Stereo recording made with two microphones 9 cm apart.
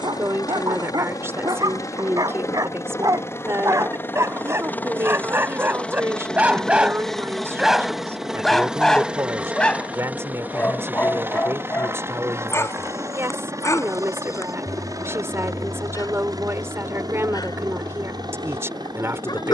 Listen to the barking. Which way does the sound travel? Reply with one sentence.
You can hear the barking move to the left.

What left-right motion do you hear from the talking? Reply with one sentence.
In this clip you hear the talking stay in one place.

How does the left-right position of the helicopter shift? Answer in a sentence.
In this clip you hear the helicopter travel towards the right.